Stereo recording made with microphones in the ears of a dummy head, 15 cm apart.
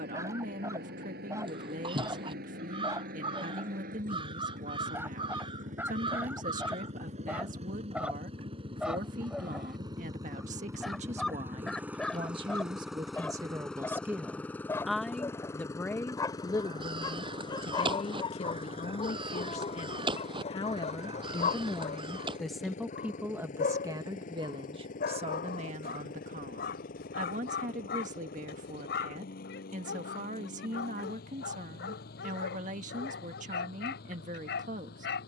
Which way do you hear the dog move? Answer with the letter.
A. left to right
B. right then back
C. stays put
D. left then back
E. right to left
E.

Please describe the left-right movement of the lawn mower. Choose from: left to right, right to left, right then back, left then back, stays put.
right to left.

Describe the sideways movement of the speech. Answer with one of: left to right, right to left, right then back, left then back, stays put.
left then back.